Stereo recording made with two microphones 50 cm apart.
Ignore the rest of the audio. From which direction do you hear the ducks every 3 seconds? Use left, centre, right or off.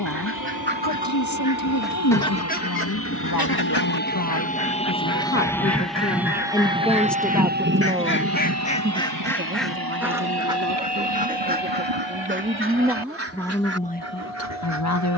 centre, left, left, centre, right.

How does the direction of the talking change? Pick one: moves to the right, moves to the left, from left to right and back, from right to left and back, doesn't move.
from left to right and back.